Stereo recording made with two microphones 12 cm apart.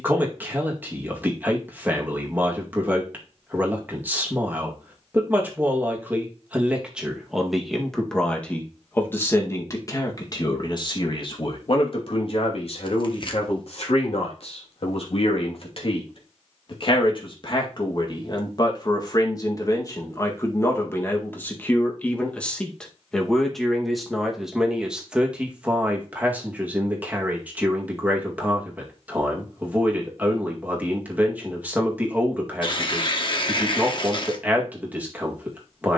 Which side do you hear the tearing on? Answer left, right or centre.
left.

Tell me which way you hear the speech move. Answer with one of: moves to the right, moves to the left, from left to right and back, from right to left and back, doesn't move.
from right to left and back.